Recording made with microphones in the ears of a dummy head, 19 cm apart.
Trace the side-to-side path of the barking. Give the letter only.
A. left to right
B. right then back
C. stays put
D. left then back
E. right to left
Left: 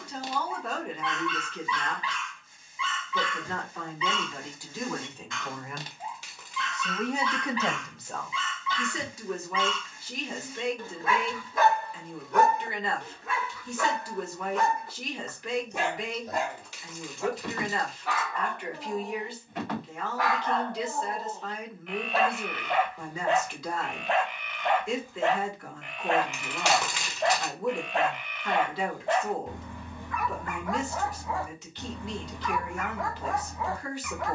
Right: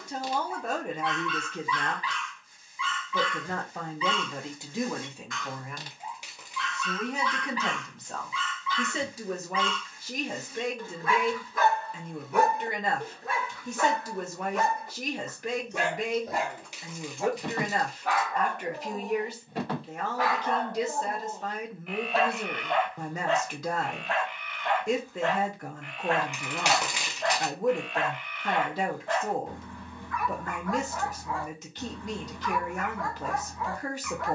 B.